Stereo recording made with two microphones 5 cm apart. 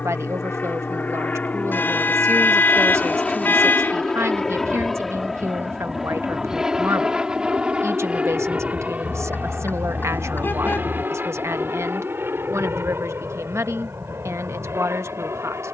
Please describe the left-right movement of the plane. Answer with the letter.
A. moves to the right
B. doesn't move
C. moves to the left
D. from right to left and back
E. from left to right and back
A.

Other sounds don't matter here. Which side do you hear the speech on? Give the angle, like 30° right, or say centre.
60° right.